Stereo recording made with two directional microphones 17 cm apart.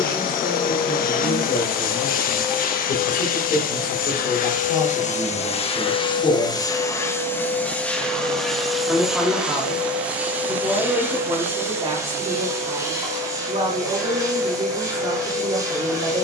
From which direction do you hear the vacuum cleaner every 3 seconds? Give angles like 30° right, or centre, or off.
50° left, 50° left, 10° left, 10° right, 20° right, 20° right.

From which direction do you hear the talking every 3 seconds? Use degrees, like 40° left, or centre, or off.
60° left, 50° left, 20° left, 20° right, 30° right, 30° right.